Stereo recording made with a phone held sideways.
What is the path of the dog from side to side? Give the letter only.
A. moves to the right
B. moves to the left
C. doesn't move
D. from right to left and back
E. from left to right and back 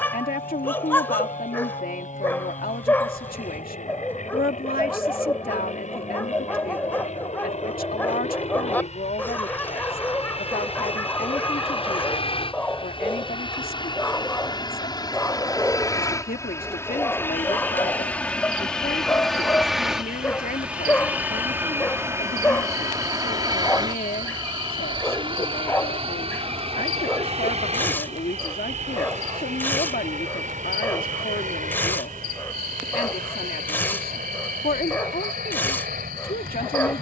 C.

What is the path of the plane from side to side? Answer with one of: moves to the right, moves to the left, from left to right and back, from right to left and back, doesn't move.
moves to the right.